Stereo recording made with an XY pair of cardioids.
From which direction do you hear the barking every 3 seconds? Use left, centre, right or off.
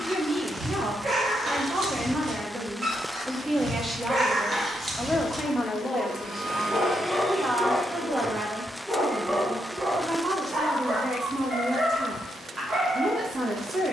right, right, centre, right, right.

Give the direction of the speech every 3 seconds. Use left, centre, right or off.
right, centre, right, right, right.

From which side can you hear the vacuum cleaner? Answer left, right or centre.
right.